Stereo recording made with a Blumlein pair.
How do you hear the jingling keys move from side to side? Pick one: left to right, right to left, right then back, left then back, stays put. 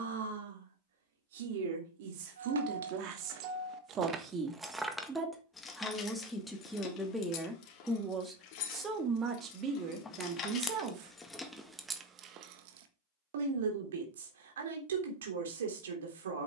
left then back.